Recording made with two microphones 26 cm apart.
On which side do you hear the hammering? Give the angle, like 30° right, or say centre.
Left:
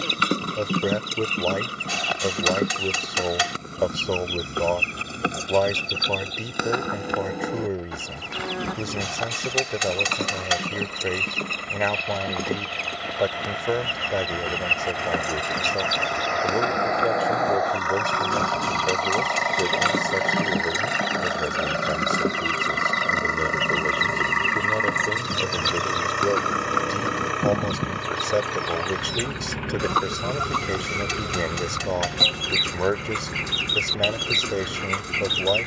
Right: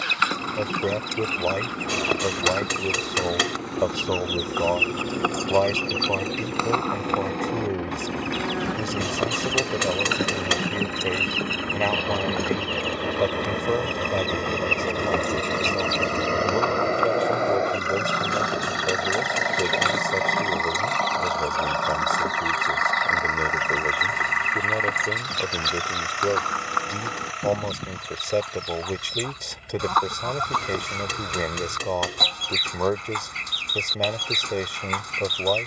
50° right.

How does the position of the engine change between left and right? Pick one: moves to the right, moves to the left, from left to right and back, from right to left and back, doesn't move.
moves to the left.